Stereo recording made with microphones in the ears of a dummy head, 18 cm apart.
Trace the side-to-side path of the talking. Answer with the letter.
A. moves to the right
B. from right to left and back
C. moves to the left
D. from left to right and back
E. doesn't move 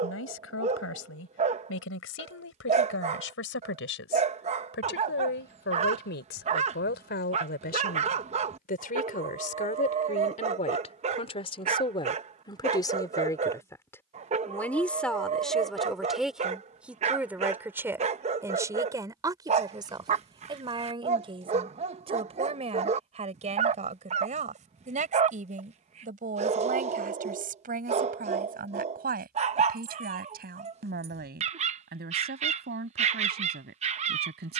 A.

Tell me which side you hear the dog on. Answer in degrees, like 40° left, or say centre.
30° right.